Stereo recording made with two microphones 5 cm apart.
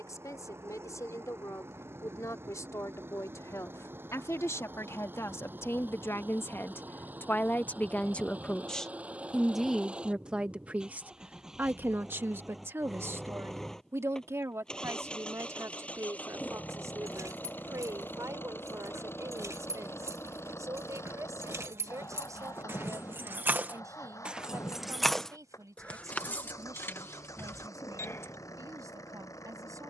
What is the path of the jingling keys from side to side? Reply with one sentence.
In this clip you hear the jingling keys go from the right side to the left.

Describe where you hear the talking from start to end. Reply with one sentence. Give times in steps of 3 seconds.
In this clip you hear the talking on the left from 0 s and on the right from 9 s.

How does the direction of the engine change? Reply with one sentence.
You can hear the engine travel towards the left.